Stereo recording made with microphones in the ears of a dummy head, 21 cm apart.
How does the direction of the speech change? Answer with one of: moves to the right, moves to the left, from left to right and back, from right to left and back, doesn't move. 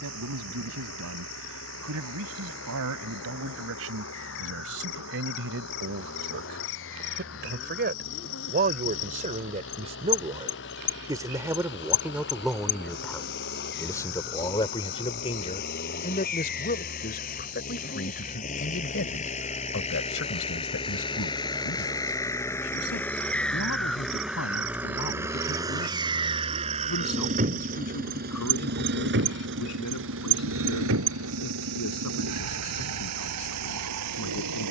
moves to the left.